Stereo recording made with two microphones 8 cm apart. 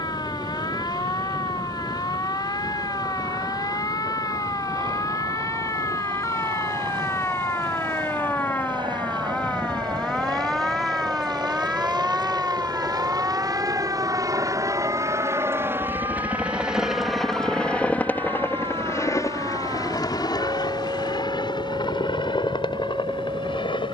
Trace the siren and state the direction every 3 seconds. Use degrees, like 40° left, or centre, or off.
60° left, 50° left, 30° left, centre, 30° right, 50° right, 70° right, 70° right.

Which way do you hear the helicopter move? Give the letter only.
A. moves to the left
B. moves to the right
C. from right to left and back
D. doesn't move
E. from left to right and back
A.